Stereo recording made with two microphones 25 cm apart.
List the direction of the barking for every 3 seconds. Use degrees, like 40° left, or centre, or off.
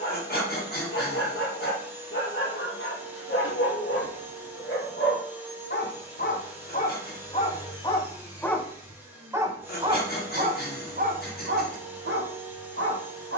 50° left, 50° left, 20° left, 30° right, 50° right.